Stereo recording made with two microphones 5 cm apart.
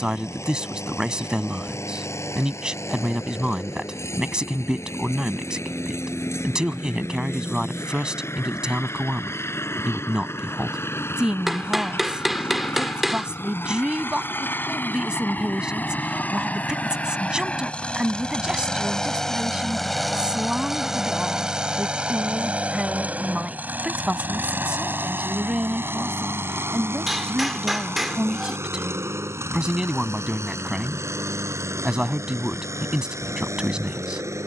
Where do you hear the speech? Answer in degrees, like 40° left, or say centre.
10° right.